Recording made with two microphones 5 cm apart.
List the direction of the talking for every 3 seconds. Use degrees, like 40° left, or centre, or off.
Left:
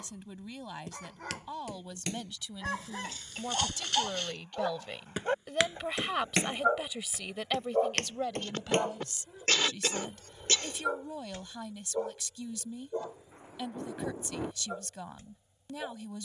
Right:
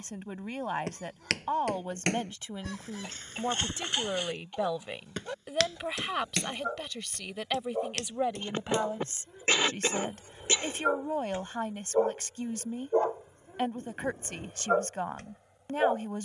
40° right, 20° right, 10° right, 40° right, 40° right, 40° right.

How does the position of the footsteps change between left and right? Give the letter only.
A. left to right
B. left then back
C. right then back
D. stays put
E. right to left
E.